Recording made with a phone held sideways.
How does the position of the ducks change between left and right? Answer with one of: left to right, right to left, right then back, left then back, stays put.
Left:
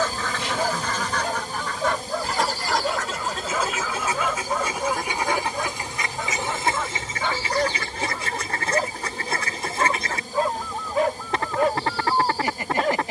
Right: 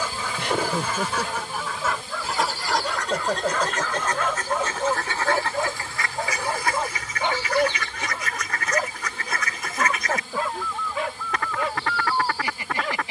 right to left.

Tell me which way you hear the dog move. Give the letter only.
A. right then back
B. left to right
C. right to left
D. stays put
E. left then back
A.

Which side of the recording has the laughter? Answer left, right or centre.
right.